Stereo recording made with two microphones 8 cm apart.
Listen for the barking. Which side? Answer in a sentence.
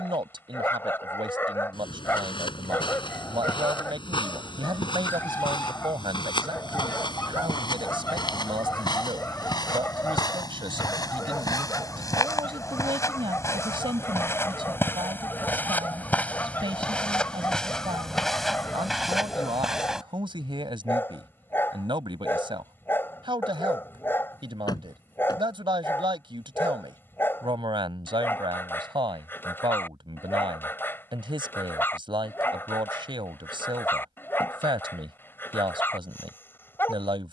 In this clip you hear the barking on the left.